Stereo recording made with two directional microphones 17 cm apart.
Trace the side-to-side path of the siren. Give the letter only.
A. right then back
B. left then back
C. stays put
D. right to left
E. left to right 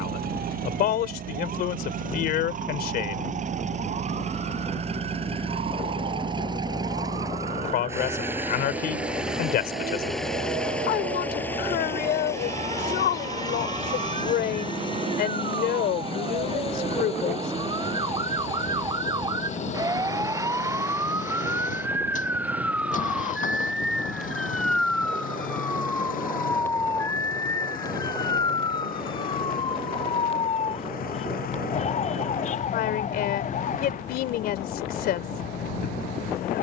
D.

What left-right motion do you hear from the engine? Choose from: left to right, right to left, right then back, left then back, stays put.
right to left.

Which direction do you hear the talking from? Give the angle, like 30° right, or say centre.
60° left.